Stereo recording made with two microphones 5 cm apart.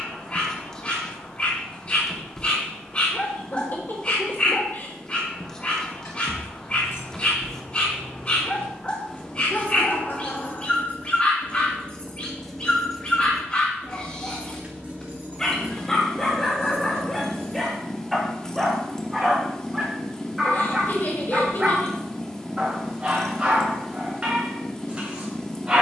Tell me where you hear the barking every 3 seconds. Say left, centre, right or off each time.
left, left, left, left, left, centre, centre, right, right.